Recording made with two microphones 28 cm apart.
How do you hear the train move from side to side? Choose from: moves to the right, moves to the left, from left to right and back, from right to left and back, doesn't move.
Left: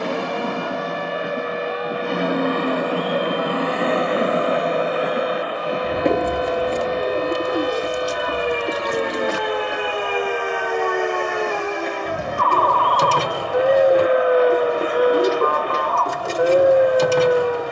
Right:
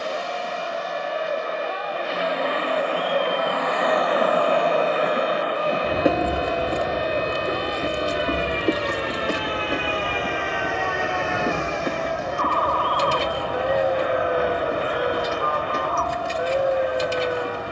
moves to the right.